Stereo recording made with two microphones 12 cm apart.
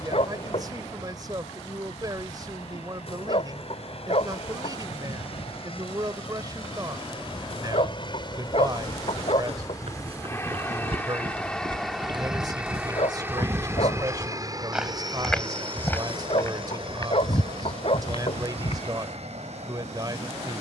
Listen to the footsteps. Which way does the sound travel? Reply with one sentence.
In this clip you hear the footsteps go from the right side to the left.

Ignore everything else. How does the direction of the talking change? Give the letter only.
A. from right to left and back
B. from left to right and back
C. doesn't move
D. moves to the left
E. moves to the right
C.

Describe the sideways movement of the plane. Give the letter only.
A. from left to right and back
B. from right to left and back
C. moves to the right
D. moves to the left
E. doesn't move
C.